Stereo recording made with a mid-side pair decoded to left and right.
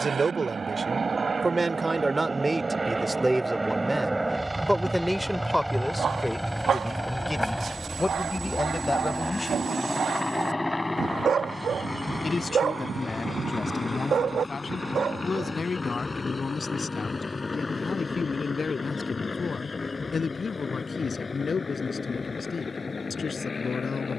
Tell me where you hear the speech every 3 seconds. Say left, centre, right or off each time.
right, centre, left, left, left, left, left, left.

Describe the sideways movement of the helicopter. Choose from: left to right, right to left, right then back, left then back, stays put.
right to left.